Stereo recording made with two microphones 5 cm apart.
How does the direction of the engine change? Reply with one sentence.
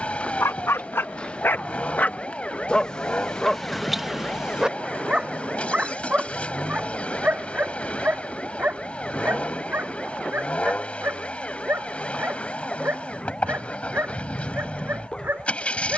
In this clip you hear the engine stay in one place.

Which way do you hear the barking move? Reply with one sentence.
In this clip you hear the barking move from left to right.